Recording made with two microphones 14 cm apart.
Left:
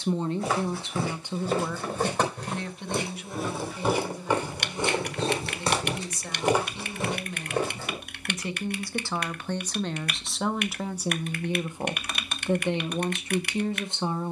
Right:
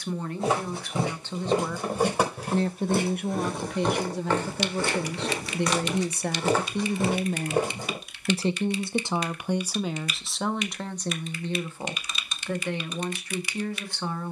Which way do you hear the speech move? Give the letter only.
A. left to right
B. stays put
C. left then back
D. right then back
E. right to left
D.